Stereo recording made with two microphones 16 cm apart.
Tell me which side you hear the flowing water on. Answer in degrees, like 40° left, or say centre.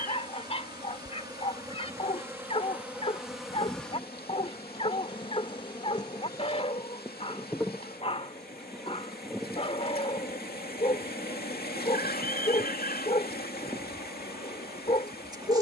80° left.